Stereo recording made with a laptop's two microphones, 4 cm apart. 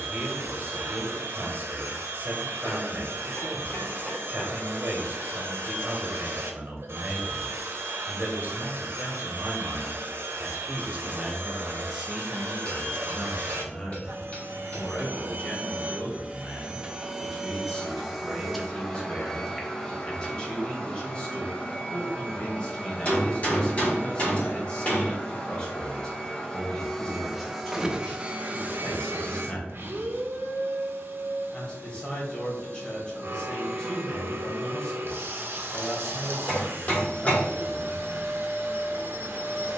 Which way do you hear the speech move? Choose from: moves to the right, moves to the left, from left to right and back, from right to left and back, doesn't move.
moves to the left.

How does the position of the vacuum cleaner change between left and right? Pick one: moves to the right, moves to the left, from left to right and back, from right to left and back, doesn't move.
from right to left and back.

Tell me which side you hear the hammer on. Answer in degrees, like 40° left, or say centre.
30° left.